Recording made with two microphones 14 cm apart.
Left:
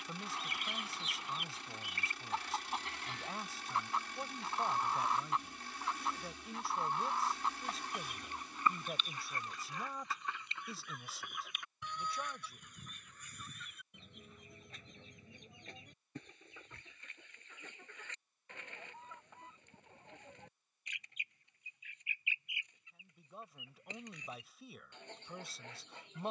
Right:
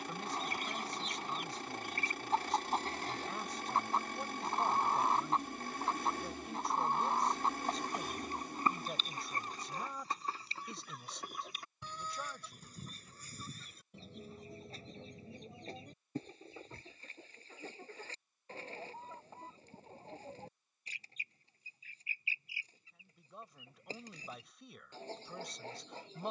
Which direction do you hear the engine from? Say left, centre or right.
right.